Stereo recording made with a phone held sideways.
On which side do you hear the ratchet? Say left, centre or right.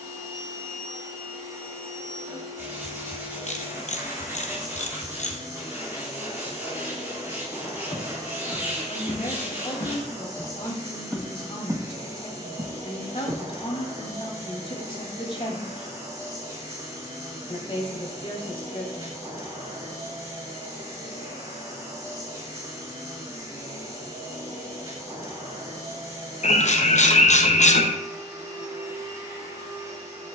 left.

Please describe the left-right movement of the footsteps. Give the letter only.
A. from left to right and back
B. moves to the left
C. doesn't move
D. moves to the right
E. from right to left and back
D.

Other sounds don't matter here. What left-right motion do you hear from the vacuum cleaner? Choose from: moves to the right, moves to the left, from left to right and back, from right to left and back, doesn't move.
doesn't move.